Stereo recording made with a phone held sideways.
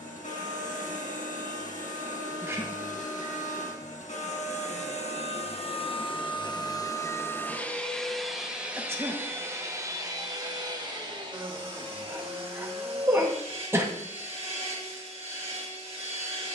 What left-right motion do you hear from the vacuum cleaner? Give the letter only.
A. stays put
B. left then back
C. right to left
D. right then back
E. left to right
E.